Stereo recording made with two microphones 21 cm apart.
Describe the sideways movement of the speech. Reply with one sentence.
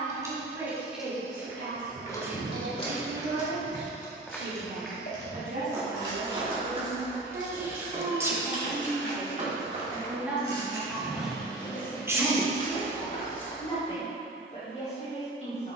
In this clip you hear the speech move to the left.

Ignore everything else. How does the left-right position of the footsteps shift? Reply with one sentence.
In this clip you hear the footsteps go right and come back.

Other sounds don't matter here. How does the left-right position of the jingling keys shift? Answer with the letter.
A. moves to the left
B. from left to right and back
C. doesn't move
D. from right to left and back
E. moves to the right
D.